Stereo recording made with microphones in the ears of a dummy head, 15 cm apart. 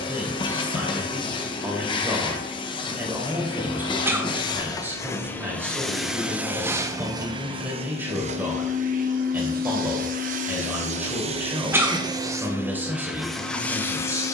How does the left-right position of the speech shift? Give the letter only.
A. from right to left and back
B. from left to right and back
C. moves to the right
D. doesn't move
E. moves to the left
D.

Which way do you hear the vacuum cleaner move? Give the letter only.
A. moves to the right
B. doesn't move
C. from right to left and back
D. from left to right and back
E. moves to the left
D.